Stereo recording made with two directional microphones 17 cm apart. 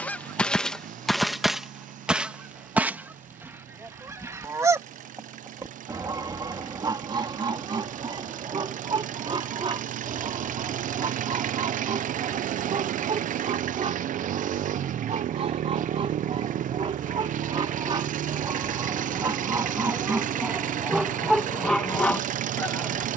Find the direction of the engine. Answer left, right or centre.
right.